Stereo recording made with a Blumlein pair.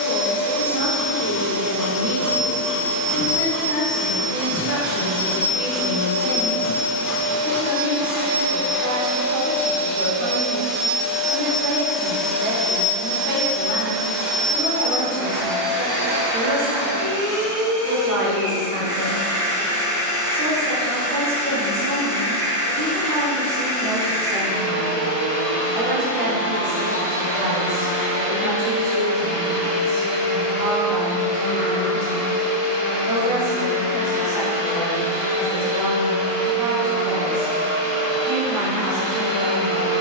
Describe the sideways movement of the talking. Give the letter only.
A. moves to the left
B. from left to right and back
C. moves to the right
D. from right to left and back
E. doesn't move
E.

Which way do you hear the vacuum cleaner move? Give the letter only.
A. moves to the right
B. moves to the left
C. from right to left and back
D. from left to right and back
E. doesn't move
C.